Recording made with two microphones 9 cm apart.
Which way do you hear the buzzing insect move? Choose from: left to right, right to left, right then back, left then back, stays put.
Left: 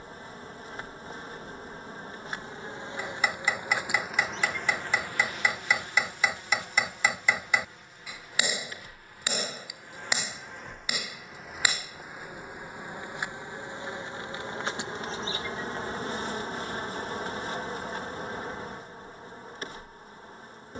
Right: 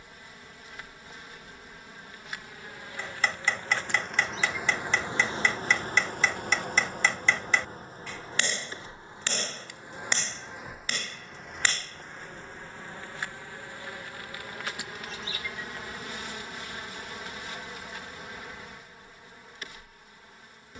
right then back.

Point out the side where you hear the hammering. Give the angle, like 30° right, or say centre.
10° left.